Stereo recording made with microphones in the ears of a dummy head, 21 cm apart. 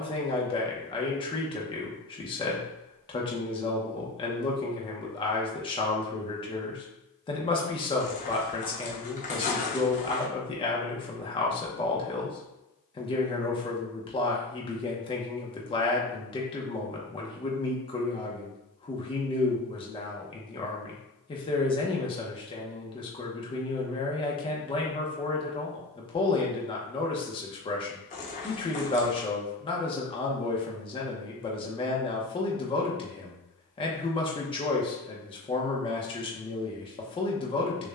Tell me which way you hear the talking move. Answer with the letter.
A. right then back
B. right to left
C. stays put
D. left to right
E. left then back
C.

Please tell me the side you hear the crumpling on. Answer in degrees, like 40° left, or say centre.
30° left.